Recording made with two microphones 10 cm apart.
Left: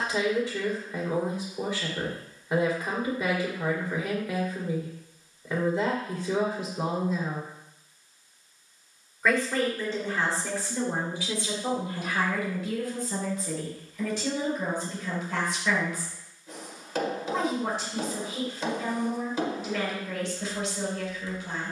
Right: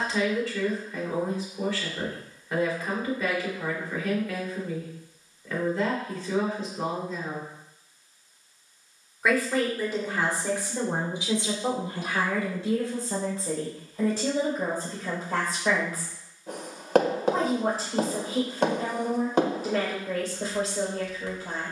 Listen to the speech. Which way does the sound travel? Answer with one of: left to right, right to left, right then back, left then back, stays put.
left to right.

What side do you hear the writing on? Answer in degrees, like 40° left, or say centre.
60° right.